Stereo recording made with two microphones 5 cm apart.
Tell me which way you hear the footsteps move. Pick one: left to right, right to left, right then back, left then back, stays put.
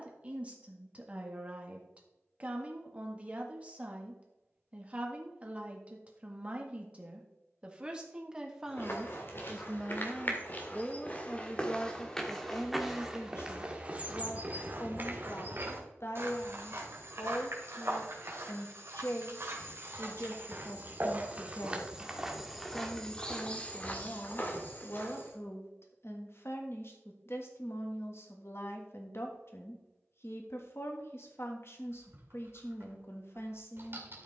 right then back.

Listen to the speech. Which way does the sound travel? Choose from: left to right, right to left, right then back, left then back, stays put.
right to left.